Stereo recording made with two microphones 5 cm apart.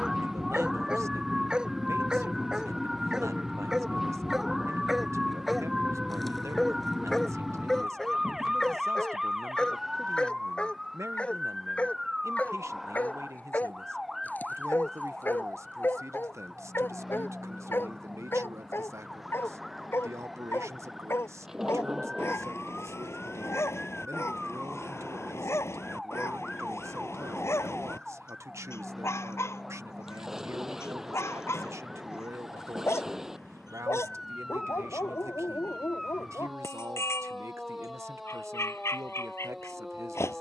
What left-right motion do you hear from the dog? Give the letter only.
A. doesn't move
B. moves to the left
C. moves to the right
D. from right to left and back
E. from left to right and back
B.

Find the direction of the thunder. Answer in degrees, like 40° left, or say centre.
10° right.